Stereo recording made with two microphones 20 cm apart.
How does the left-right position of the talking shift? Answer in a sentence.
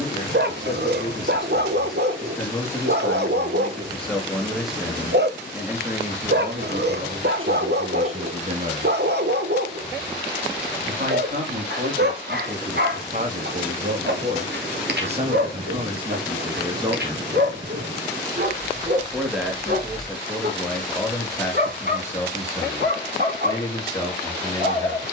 You can hear the talking go right and come back.